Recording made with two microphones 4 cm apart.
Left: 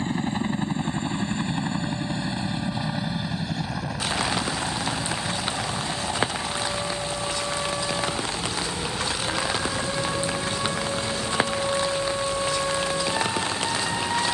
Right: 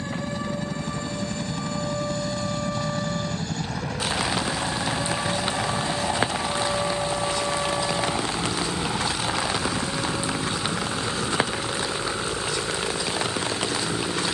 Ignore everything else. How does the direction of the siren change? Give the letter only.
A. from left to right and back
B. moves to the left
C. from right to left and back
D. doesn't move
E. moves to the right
B.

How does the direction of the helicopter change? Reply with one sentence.
In this clip you hear the helicopter travel towards the right.